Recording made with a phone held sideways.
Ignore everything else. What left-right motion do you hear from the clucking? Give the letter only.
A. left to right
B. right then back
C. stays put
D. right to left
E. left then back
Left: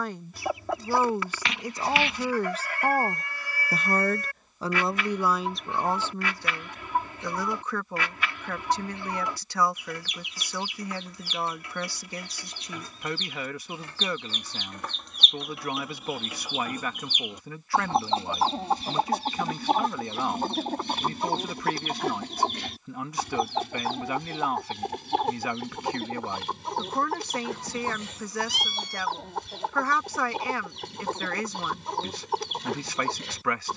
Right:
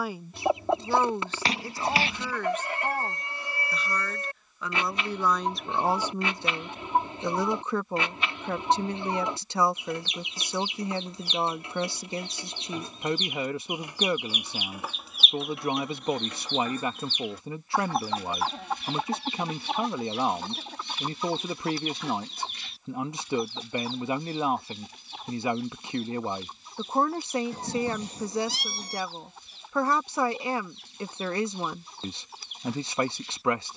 D.